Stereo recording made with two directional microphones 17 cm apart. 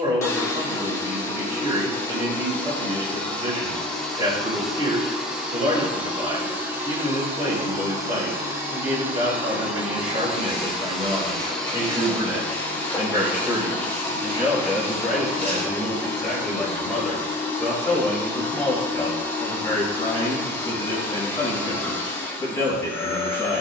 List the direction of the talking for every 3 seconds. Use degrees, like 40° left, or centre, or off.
30° right, 30° right, 30° right, 30° right, 10° right, centre, 10° left, 20° left.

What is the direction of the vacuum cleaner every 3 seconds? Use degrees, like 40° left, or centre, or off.
10° left, centre, 10° right, centre, 10° left, 10° left, 10° left, 10° left.